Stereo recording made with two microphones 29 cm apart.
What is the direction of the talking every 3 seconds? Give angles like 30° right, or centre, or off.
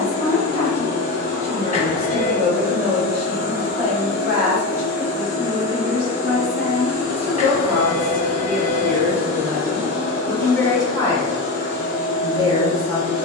10° left, 30° right, 20° right, 10° left, 10° left.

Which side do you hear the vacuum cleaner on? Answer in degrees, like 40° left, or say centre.
60° left.